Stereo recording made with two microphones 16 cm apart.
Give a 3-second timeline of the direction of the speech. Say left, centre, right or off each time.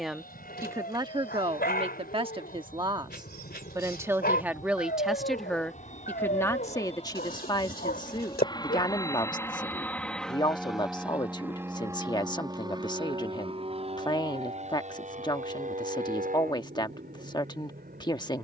right, centre, left, left, left, left.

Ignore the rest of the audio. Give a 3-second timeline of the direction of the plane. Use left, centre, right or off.
left, left, left, centre, right, right.